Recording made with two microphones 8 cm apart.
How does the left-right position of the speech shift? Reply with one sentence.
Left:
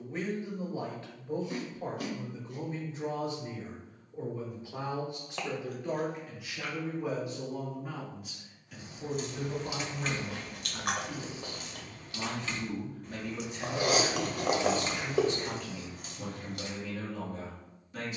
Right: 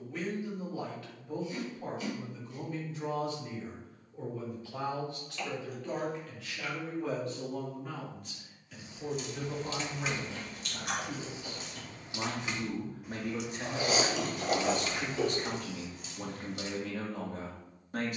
You can hear the speech move to the right.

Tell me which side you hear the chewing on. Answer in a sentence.
In this clip you hear the chewing on the left.